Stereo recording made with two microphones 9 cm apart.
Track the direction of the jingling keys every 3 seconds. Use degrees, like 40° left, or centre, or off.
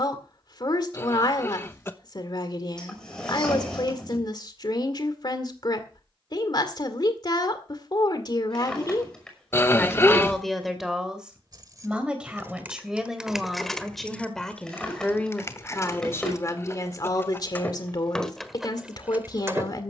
off, off, off, 40° right, centre, 30° left, 10° right.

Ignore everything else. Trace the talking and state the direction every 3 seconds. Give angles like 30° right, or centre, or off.
50° left, 50° left, 50° left, centre, centre, 30° left, 50° left.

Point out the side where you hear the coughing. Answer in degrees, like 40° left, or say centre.
30° left.